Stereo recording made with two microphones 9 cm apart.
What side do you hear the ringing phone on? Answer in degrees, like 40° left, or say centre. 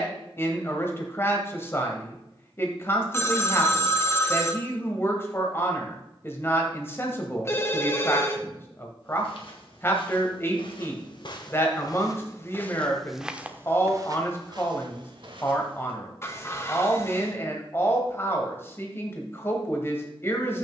30° left.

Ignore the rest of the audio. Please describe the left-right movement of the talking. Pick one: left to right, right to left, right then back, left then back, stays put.
stays put.